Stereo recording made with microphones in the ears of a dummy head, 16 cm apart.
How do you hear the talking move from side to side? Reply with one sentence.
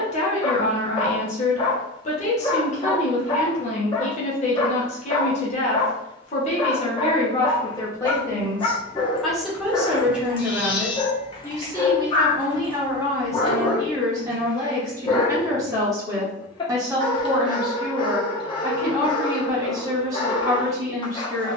You can hear the talking travel towards the right.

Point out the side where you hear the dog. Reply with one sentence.
You can hear the dog on the left.